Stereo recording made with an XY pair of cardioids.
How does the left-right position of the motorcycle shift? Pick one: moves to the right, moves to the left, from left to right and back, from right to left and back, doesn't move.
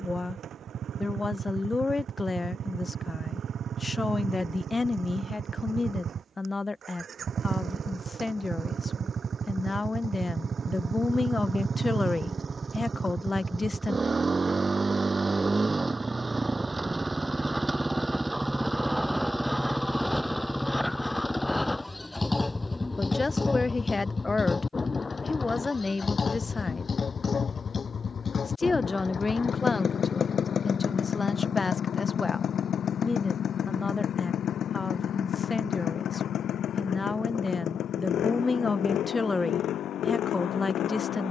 moves to the left.